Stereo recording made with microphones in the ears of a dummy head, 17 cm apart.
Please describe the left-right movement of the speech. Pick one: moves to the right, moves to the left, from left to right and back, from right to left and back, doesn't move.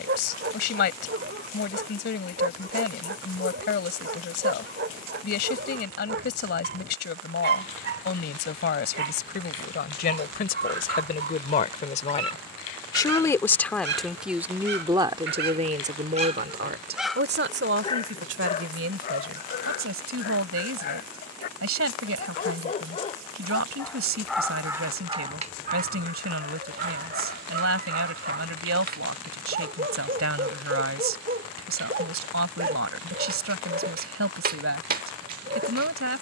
moves to the right.